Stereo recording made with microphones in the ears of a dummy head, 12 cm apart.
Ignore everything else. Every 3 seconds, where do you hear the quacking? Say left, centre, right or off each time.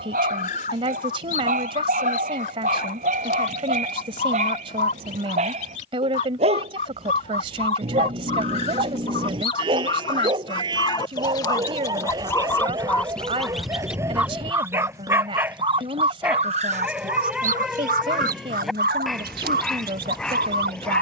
left, left, left, left, centre, right, right.